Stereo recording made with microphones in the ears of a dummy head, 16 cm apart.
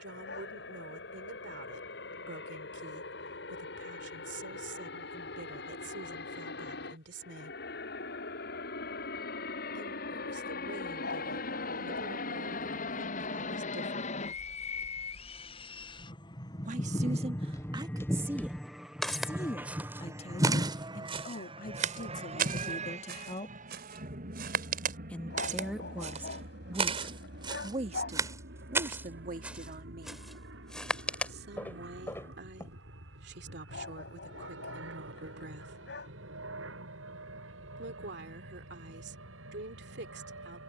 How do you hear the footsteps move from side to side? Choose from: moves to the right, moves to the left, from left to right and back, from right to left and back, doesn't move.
from left to right and back.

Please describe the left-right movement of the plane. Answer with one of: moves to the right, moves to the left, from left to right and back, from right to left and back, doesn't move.
moves to the right.